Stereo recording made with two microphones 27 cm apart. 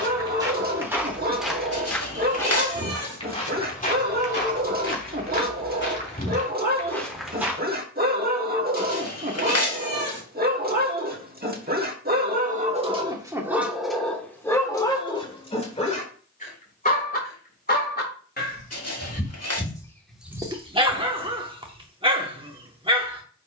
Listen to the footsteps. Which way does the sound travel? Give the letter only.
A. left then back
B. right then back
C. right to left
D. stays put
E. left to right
A.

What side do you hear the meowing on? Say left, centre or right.
left.